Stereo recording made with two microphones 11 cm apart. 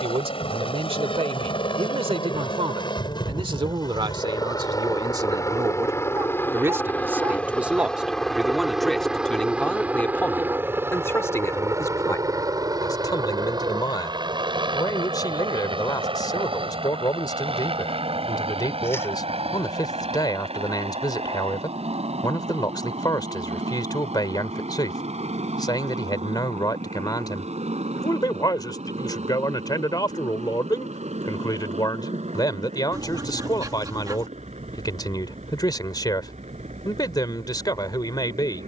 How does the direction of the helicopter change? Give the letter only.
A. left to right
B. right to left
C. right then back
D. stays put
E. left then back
A.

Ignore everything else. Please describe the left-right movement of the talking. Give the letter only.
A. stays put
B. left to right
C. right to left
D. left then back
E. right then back
C.